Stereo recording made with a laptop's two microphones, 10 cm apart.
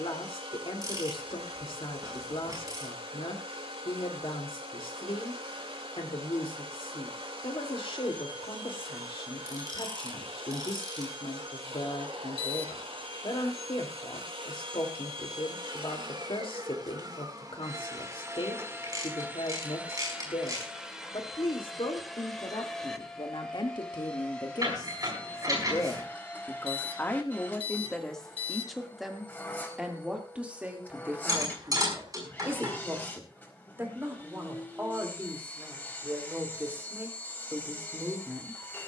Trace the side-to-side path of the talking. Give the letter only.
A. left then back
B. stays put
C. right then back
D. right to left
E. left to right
E.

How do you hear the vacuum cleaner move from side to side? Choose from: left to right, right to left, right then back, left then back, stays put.
right to left.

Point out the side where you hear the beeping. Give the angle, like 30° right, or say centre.
70° left.